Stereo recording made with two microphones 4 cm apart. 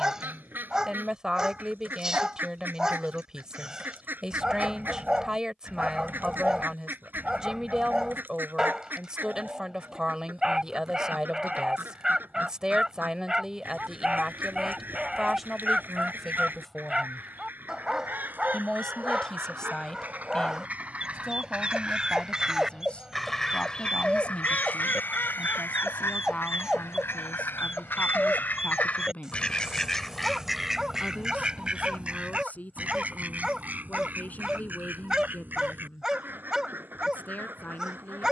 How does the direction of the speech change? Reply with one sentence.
You can hear the speech move to the left.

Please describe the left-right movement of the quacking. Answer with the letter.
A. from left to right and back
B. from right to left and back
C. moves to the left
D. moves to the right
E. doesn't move
B.